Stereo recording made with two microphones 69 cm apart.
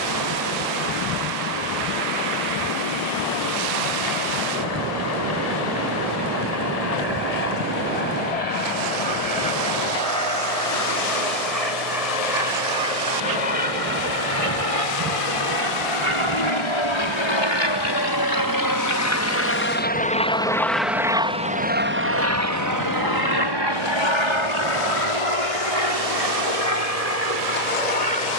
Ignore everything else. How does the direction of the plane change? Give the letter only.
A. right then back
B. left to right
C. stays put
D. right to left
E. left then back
B.